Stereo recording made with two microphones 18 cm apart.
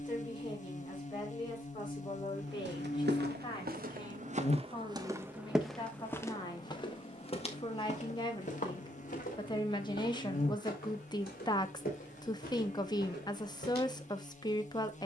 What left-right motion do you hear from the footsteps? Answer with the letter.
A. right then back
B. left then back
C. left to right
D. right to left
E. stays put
D.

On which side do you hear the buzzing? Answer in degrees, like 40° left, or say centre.
40° left.